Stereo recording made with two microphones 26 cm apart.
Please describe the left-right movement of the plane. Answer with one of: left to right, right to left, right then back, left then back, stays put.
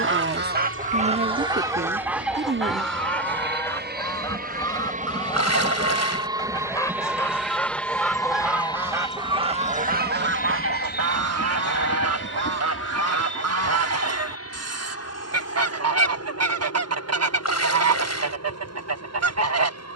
right to left.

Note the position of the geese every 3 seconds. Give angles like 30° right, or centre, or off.
20° right, 10° left, centre, 50° right, 70° right, 70° right, 70° right.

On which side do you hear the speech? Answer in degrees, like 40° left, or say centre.
40° right.